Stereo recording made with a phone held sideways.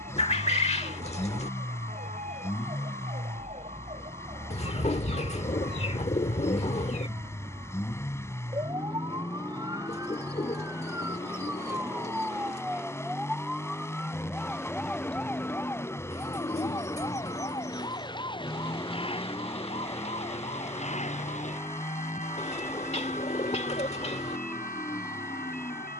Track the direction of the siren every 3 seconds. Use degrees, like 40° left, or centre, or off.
50° right, 40° right, 30° right, 20° right, centre, 20° left, 30° left, 50° left, 60° left.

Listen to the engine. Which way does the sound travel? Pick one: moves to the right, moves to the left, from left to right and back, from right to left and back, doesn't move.
doesn't move.